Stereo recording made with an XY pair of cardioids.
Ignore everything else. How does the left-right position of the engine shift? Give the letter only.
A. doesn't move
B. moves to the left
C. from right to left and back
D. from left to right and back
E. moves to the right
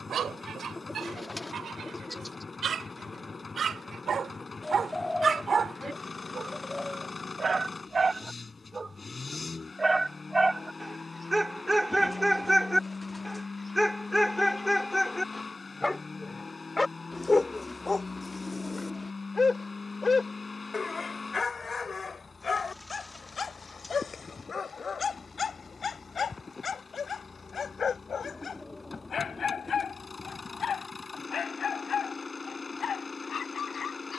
A.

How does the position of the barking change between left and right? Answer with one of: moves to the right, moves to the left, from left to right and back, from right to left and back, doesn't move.
moves to the left.